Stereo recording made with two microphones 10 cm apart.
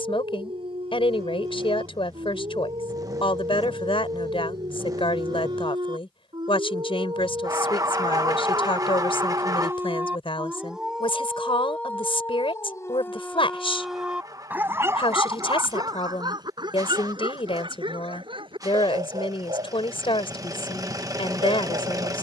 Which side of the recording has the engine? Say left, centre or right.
right.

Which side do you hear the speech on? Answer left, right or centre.
left.